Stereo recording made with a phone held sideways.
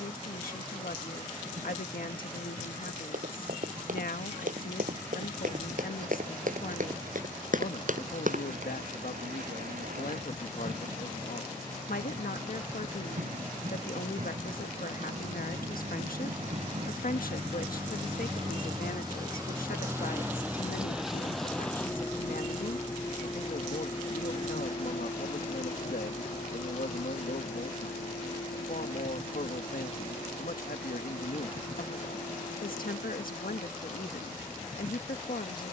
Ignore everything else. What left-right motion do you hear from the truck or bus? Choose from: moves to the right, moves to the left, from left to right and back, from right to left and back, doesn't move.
moves to the left.